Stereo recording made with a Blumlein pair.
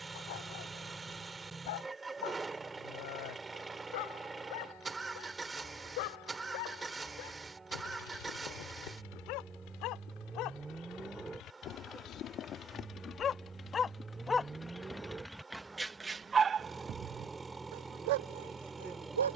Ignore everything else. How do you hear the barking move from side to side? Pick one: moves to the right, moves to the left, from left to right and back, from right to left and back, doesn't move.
moves to the right.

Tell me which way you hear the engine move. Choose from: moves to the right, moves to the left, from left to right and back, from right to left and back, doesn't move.
doesn't move.